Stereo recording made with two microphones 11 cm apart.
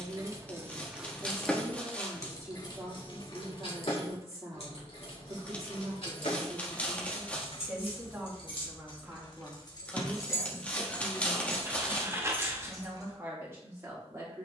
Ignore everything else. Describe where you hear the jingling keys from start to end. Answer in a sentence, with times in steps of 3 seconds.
In this clip you hear the jingling keys in the centre from 0 s, on the left from 3 s and on the right from 12 s.